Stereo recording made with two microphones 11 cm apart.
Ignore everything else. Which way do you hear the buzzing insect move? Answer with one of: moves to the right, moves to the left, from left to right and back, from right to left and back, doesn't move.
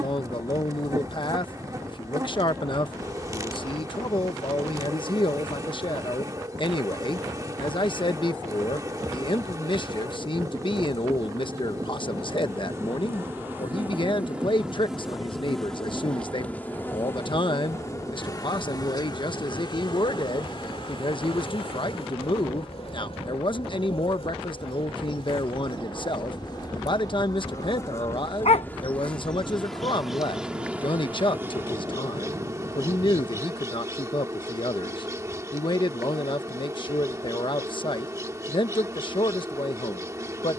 from right to left and back.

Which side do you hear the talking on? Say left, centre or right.
left.